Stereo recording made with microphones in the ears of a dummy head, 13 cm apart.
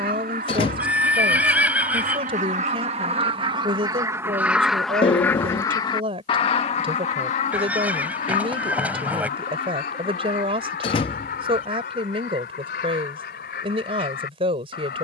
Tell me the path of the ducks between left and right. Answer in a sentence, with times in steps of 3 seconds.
You can hear the ducks on the right from 0 s, in the centre from 3 s and on the left from 6 s.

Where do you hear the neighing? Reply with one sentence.
In this clip you hear the neighing in the centre.